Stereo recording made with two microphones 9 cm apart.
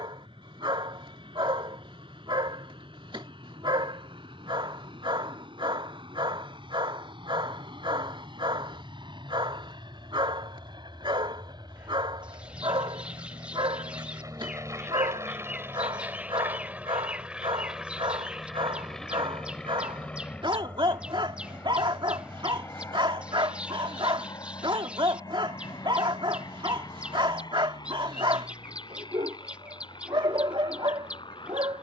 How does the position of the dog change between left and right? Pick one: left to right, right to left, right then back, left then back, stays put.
stays put.